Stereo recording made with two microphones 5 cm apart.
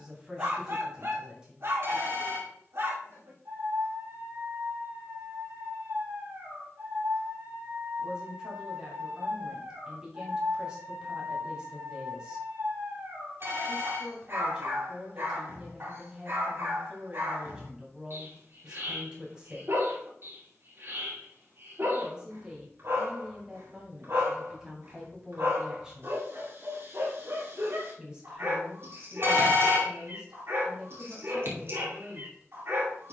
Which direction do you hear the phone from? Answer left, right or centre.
right.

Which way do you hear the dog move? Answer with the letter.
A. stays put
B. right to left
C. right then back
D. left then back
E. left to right
A.